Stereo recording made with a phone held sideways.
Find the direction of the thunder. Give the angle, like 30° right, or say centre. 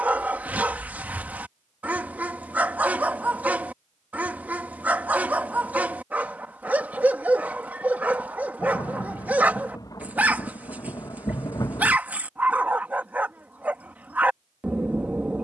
30° left.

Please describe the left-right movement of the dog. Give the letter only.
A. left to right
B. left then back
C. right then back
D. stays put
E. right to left
D.